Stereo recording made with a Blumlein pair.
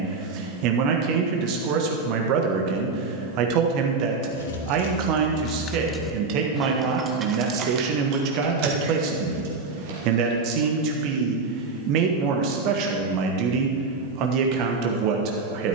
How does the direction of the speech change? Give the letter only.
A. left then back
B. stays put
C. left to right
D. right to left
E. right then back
B.